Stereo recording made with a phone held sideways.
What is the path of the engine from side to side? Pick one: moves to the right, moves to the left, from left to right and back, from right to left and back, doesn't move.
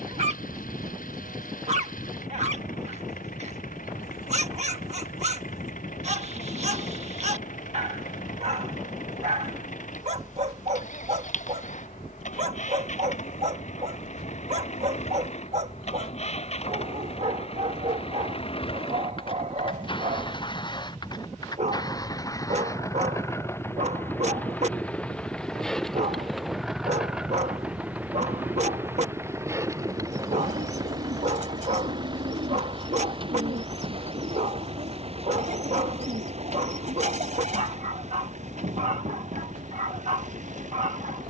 moves to the right.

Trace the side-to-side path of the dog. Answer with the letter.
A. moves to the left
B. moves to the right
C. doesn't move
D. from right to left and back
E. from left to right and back
C.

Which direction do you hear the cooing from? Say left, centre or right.
right.